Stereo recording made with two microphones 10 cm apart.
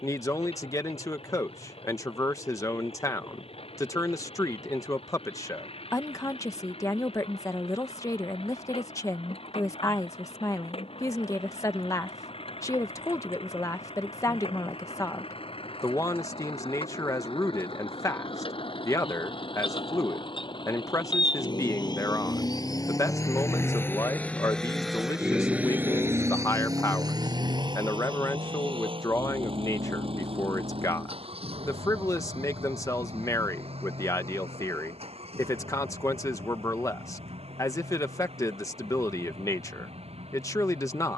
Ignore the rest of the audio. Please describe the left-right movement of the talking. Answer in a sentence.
You can hear the talking stay put.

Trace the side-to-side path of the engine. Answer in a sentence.
In this clip you hear the engine travel towards the right.